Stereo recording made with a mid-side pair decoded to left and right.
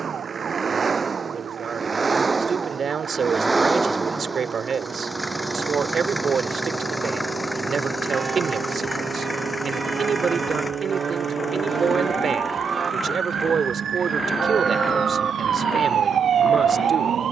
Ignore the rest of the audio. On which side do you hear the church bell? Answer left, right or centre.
right.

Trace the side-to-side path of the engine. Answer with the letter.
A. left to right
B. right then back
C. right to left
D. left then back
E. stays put
C.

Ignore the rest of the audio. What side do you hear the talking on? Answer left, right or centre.
right.